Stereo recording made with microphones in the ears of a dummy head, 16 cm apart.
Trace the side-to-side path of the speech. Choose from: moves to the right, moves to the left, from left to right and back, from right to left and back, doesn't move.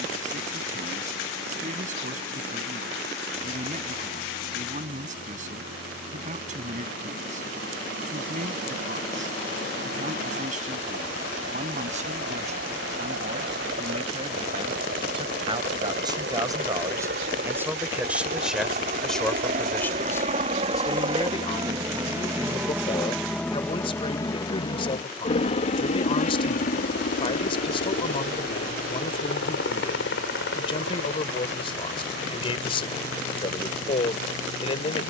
moves to the left.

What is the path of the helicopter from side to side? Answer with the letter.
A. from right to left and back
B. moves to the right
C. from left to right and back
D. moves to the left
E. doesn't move
D.